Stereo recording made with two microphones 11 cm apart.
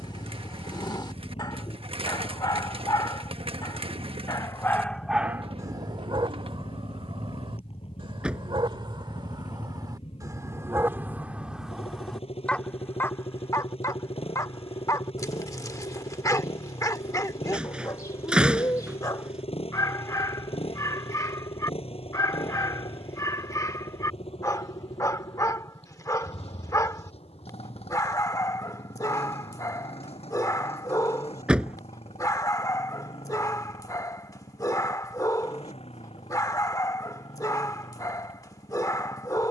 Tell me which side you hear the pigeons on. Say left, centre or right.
right.